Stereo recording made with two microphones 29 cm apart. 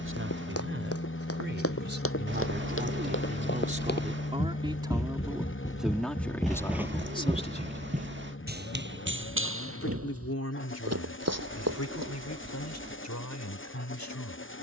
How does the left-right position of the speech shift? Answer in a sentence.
You can hear the speech move from right to left.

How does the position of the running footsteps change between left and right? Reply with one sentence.
You can hear the running footsteps travel towards the right.